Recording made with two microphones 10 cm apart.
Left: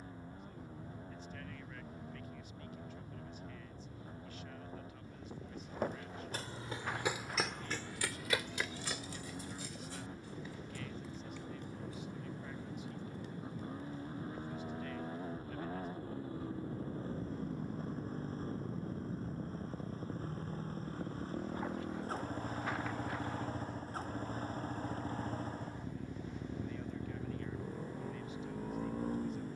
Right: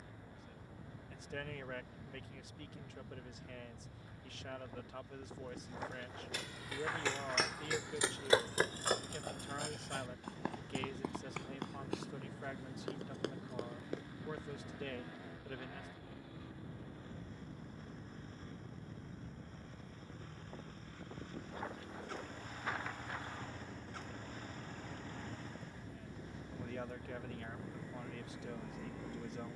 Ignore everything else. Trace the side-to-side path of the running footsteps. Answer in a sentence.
You can hear the running footsteps go from the left side to the right.